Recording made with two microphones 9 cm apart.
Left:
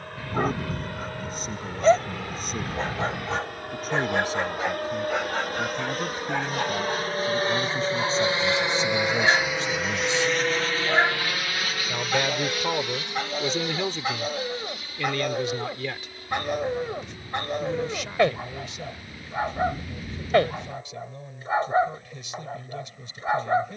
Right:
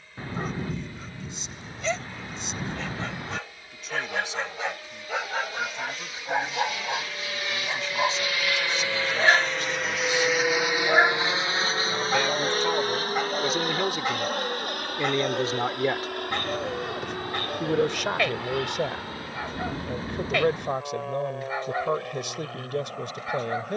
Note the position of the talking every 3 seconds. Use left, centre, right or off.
left, left, left, left, centre, right, right, right.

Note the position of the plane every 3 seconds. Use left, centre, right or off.
left, left, left, centre, right, right, right, right.